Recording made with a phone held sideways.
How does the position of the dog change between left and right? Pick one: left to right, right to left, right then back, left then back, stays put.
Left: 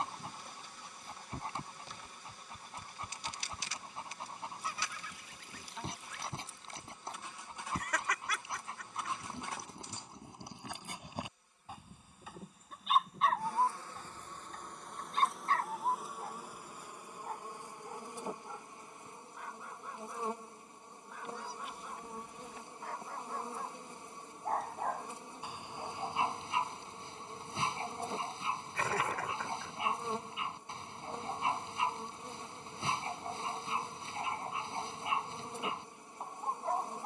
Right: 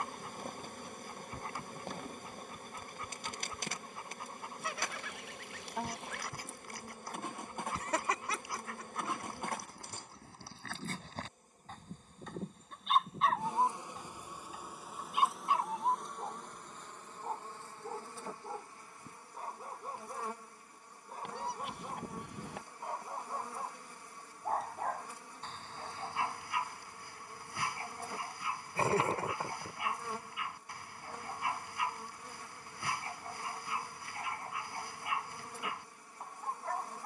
right then back.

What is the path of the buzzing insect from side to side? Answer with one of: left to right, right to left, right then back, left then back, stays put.
right to left.